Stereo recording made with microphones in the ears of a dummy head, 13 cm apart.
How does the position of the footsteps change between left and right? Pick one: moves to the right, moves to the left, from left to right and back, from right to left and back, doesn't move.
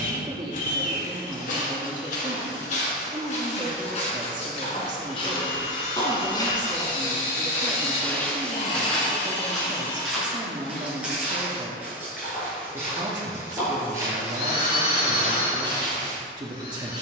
moves to the right.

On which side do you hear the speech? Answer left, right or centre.
right.